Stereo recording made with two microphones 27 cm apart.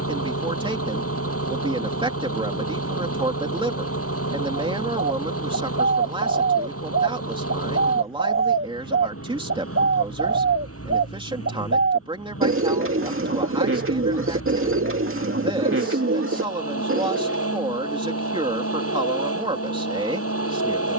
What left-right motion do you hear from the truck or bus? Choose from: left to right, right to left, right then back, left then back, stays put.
stays put.